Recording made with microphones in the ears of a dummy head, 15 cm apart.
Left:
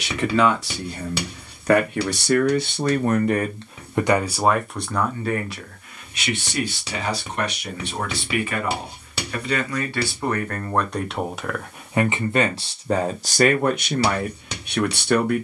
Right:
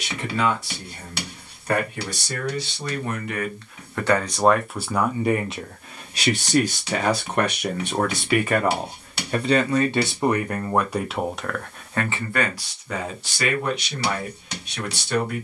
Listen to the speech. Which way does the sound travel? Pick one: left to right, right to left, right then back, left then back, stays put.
right then back.